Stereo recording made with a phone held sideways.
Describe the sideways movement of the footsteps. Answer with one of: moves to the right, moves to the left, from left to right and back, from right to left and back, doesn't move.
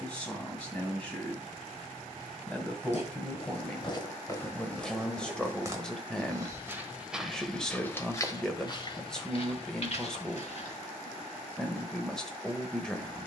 from left to right and back.